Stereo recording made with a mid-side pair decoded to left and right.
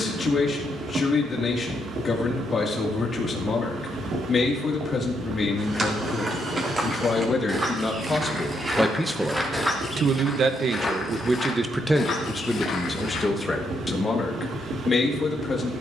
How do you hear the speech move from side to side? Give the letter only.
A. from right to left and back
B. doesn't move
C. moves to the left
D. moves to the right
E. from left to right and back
E.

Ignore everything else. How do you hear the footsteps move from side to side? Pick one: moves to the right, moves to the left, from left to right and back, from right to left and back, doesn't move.
moves to the left.